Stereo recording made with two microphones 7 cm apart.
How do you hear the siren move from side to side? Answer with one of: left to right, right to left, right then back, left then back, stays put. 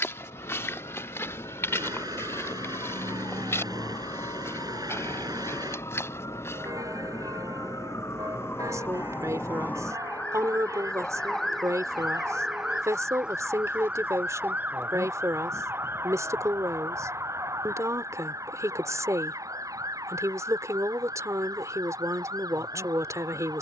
left to right.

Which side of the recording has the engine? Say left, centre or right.
right.